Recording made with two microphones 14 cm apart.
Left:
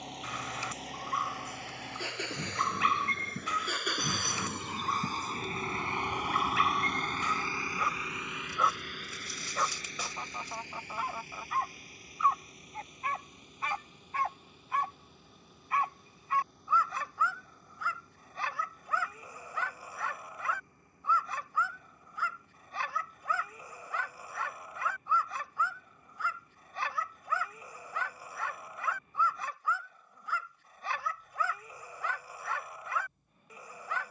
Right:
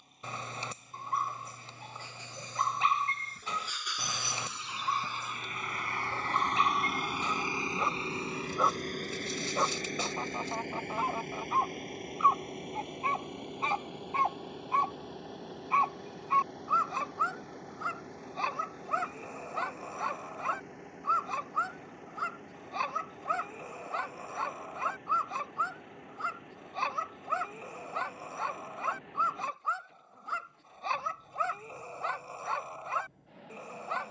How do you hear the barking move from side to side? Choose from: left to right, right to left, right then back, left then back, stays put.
stays put.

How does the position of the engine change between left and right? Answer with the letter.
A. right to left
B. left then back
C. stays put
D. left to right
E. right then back
D.